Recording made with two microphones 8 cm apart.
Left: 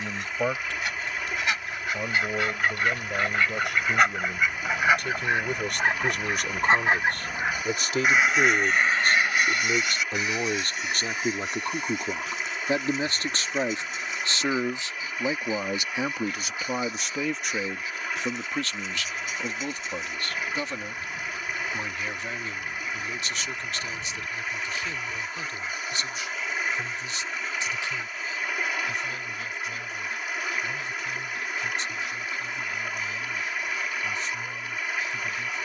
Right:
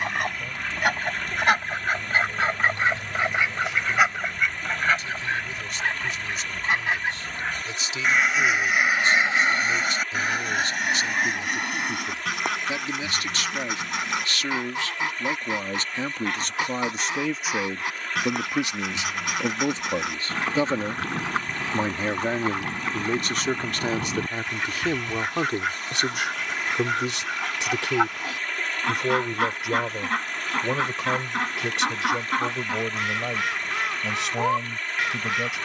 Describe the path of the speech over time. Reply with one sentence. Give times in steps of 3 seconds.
In this clip you hear the speech on the left from 0 s, in the centre from 15 s and on the right from 18 s.